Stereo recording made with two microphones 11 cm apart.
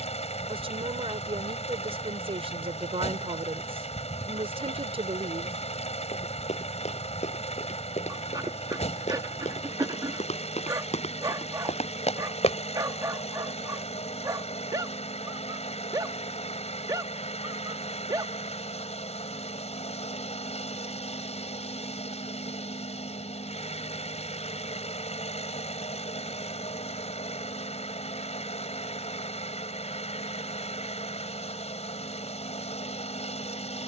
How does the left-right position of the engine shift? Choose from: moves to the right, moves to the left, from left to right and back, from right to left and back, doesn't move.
doesn't move.